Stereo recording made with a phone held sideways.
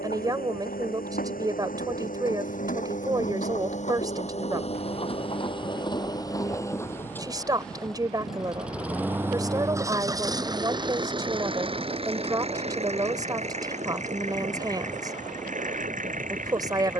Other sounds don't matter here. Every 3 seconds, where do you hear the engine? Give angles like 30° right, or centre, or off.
60° left, 40° left, 10° left, 20° right, 40° right, 50° right.